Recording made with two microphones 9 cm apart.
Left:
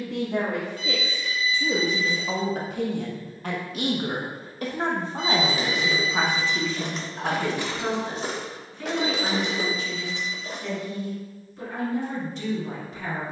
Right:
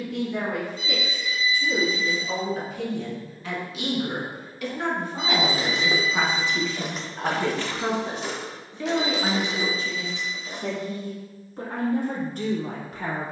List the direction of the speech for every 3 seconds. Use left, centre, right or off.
left, left, centre, right, right.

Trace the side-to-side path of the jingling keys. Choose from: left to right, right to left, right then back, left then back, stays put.
right to left.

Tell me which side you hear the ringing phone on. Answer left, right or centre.
left.